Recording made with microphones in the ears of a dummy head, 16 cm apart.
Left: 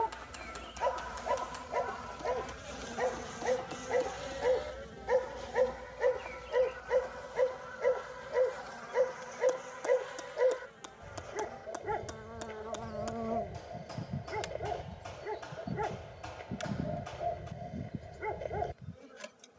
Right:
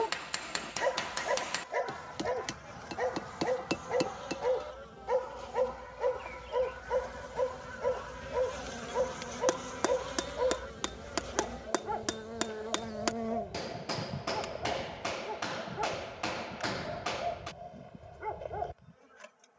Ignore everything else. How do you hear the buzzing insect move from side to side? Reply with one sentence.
In this clip you hear the buzzing insect move from left to right and back again.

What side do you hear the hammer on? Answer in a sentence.
You can hear the hammer on the right.